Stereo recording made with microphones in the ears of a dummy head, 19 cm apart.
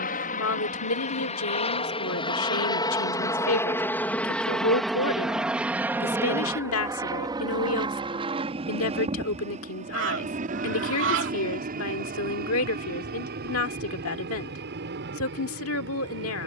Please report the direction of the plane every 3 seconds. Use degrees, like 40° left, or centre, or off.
30° left, centre, 20° right, 30° right, 40° right, 50° right.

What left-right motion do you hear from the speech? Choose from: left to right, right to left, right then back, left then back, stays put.
stays put.